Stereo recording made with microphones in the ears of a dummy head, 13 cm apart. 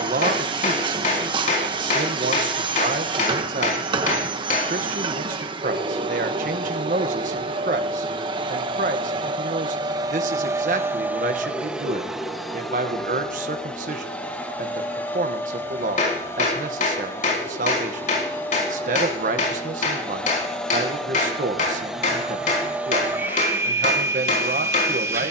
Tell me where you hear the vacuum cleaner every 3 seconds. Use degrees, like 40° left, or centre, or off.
30° right, 30° right, 30° right, 20° right, 10° left, 20° left, 10° left, 10° right, 20° right.